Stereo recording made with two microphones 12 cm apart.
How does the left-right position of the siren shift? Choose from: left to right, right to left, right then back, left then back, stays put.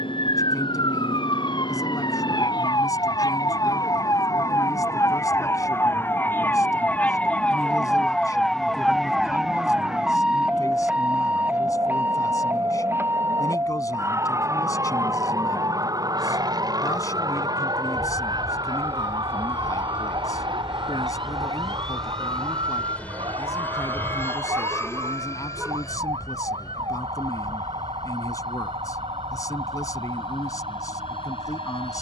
left to right.